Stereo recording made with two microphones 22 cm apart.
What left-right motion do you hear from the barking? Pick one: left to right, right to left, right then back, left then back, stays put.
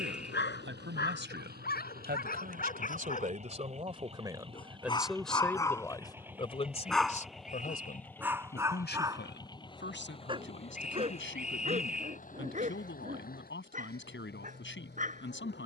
left to right.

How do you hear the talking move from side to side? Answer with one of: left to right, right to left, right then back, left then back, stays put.
right to left.